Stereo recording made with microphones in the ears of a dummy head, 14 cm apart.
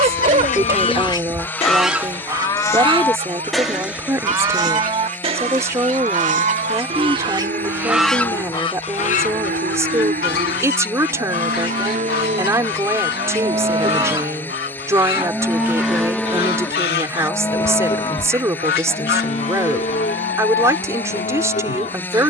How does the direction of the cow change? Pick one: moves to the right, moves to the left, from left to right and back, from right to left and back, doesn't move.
from left to right and back.